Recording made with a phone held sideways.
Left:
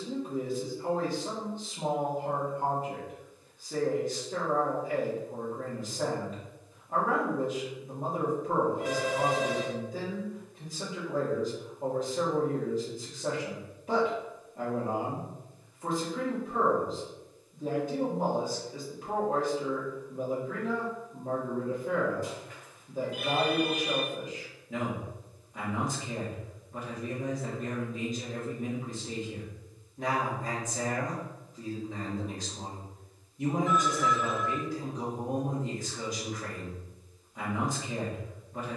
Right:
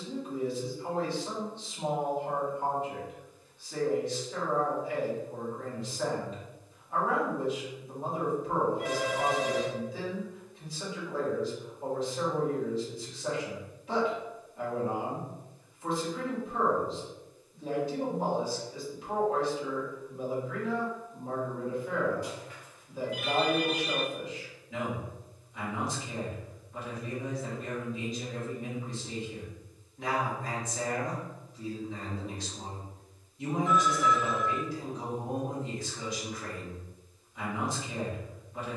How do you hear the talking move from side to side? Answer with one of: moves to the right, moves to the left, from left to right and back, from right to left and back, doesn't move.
doesn't move.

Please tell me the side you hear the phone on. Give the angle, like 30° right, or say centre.
50° left.